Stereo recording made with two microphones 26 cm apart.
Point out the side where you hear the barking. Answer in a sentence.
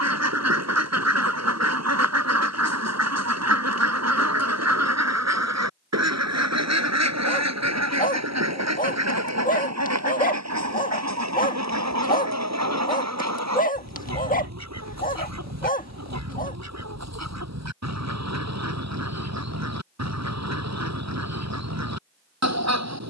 In this clip you hear the barking on the left.